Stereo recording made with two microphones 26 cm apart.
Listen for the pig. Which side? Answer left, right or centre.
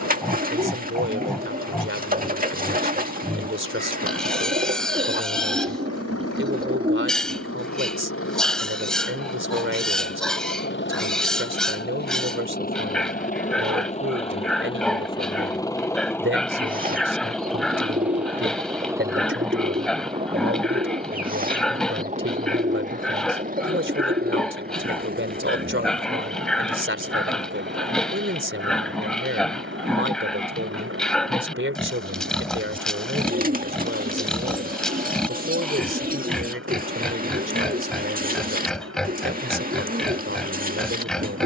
centre.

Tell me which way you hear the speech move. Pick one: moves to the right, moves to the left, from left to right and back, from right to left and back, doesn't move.
doesn't move.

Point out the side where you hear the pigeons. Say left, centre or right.
right.